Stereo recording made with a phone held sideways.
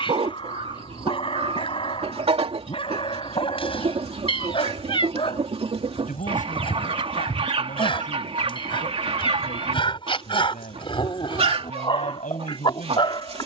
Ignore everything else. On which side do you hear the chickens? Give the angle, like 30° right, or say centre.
40° right.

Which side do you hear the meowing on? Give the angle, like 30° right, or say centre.
40° left.